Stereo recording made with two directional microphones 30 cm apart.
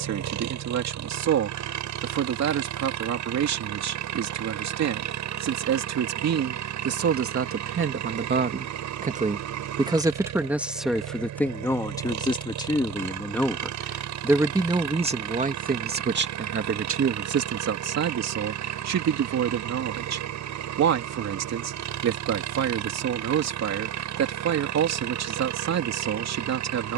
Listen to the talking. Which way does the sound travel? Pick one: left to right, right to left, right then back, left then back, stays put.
left then back.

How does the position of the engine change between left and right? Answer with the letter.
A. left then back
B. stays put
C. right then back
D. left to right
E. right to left
B.